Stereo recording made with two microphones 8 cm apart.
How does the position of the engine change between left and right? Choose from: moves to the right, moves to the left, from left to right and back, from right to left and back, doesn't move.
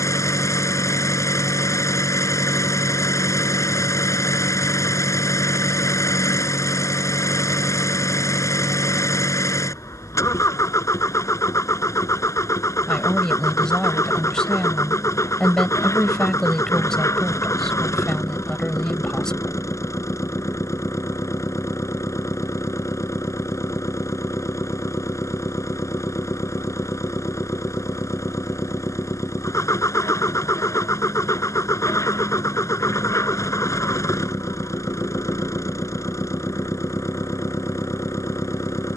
doesn't move.